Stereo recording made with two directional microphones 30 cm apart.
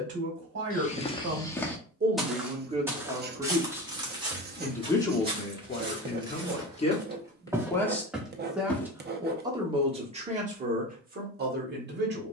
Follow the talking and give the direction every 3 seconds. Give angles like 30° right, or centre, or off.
30° right, centre, 10° left, 20° right.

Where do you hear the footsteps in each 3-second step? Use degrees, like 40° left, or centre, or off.
10° left, 10° right, 10° right, off.